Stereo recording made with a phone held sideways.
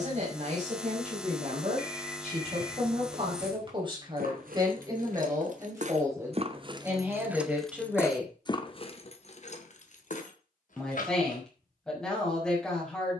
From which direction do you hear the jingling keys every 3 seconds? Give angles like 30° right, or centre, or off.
off, 70° right, centre, 60° left, off.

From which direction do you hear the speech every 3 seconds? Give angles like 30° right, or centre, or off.
50° right, 30° right, 10° right, 10° left, 10° left.